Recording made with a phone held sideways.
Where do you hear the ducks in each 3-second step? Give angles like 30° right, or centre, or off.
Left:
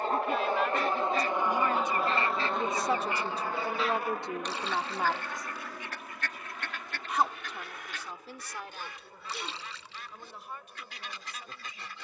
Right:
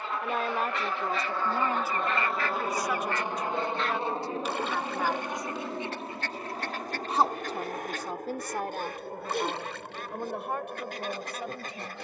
40° left, 10° right, 40° right, 50° right.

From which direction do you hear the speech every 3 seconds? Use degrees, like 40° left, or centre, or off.
20° right, 20° left, 50° right, 70° right.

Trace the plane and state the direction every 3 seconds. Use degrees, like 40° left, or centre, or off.
20° left, 30° right, 50° right, 60° right.